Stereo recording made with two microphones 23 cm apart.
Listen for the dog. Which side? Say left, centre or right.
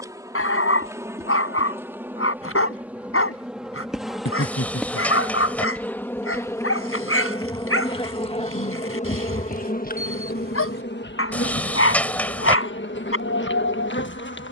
left.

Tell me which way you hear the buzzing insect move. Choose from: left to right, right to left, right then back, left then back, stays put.
right to left.